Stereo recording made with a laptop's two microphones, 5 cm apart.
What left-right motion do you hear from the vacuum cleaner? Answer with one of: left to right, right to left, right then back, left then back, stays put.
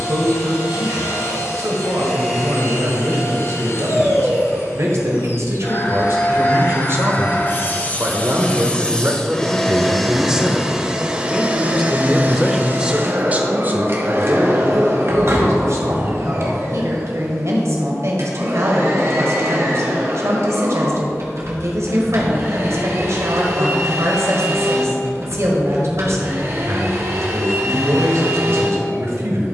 left to right.